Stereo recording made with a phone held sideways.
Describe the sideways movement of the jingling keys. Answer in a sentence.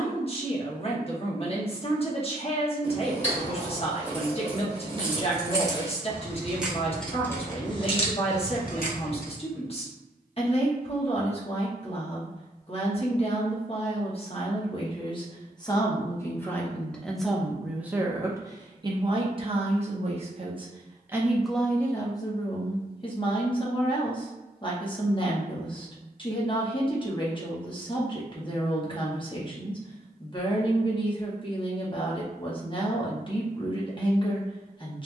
In this clip you hear the jingling keys travel towards the left.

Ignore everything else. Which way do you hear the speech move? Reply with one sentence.
In this clip you hear the speech go right and come back.